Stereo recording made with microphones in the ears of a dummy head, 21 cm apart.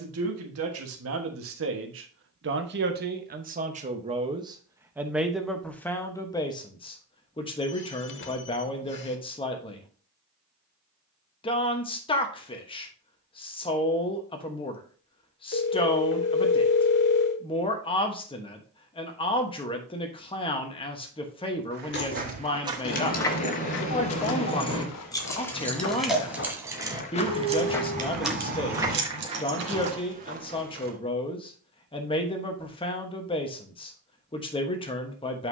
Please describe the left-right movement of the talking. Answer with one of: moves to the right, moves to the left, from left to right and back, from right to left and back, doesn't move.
moves to the left.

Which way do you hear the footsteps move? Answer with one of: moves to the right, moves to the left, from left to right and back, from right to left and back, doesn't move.
from right to left and back.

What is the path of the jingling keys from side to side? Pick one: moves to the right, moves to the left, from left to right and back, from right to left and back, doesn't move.
moves to the right.